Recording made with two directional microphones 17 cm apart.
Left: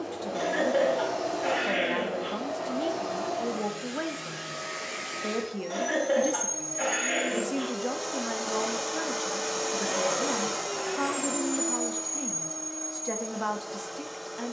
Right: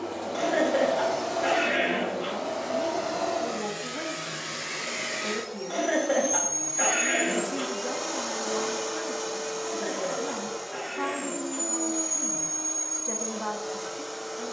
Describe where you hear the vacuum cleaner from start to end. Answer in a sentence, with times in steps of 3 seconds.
In this clip you hear the vacuum cleaner on the right from 0 s, on the left from 9 s and on the right from 12 s.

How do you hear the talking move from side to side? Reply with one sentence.
You can hear the talking stay in one place.